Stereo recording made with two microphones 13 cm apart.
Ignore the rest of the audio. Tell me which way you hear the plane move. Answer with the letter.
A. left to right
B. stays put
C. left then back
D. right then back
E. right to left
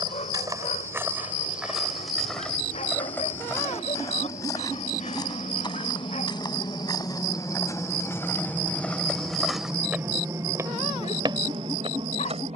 A.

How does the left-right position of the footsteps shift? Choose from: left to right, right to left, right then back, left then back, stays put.
left then back.